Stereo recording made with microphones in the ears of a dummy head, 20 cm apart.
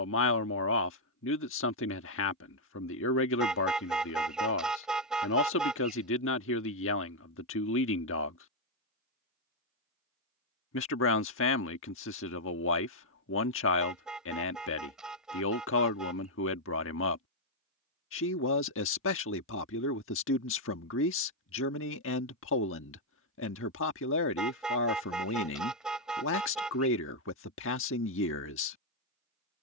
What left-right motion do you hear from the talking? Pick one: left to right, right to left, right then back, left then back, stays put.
stays put.